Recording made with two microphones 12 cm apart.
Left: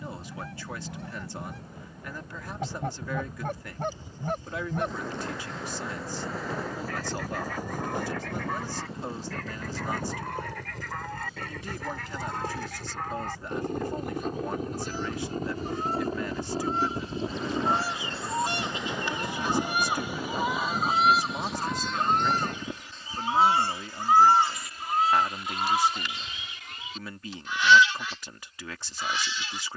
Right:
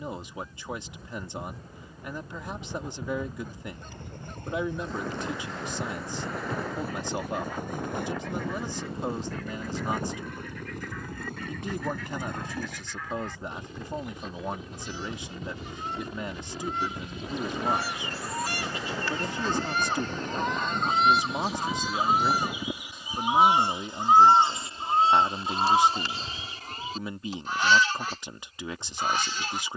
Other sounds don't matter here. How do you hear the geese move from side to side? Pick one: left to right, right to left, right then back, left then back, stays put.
left to right.